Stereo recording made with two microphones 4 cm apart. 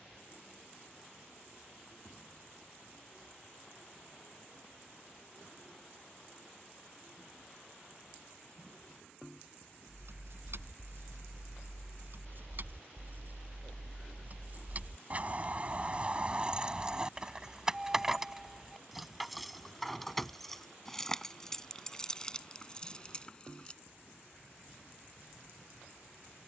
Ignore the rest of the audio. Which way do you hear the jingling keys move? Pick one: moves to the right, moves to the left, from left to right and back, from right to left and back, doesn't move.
moves to the left.